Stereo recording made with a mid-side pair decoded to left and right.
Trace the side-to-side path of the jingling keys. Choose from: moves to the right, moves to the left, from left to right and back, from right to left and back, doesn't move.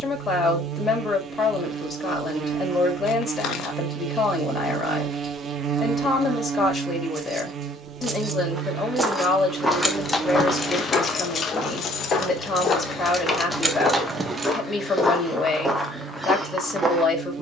from right to left and back.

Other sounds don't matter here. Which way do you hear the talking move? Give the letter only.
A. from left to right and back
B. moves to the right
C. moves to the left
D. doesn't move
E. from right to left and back
D.